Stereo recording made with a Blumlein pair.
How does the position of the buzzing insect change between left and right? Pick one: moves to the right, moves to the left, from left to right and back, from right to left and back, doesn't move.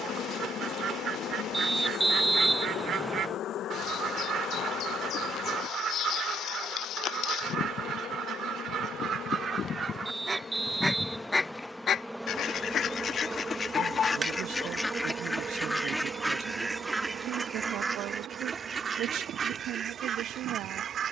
moves to the right.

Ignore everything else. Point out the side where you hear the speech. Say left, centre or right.
right.